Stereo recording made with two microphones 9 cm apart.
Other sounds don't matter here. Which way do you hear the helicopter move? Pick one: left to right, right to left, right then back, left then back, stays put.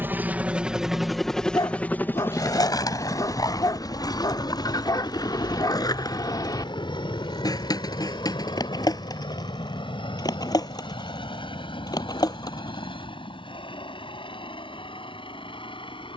right to left.